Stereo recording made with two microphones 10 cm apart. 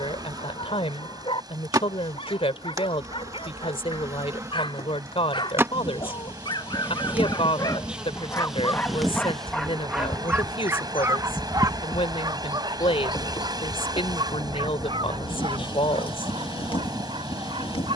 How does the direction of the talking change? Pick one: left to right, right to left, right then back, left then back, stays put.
stays put.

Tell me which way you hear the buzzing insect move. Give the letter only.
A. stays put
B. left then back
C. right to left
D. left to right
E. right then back
C.